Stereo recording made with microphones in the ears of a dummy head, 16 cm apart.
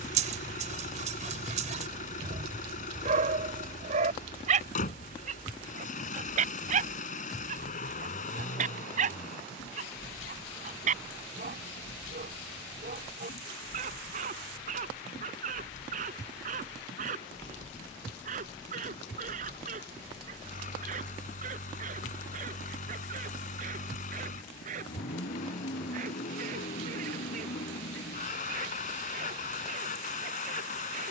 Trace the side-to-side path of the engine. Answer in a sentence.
You can hear the engine stay in one place.